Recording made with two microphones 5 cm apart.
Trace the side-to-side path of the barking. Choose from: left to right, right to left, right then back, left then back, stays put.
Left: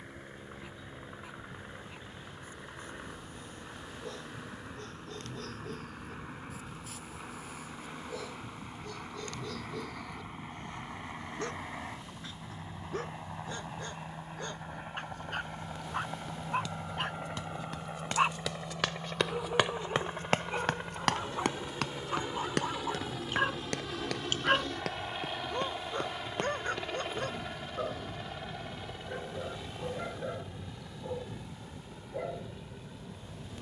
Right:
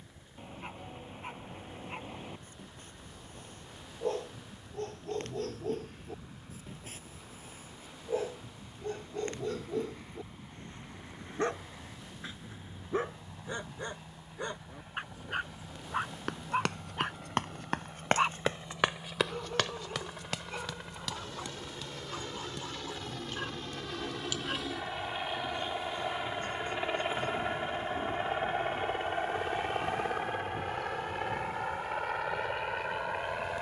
right to left.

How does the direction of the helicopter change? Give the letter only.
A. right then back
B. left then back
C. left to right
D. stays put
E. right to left
C.